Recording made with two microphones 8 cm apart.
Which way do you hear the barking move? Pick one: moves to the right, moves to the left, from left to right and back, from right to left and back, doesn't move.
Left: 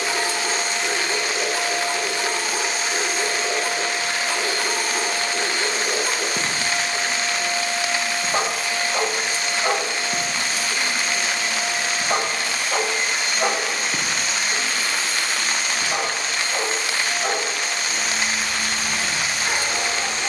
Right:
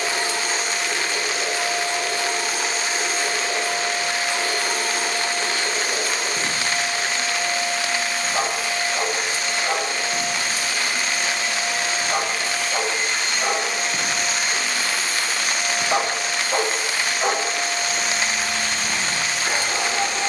moves to the right.